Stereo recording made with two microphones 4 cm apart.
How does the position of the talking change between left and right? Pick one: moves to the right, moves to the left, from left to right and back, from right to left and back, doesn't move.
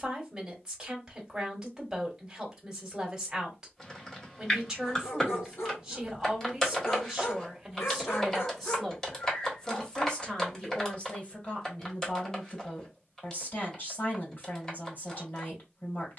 moves to the left.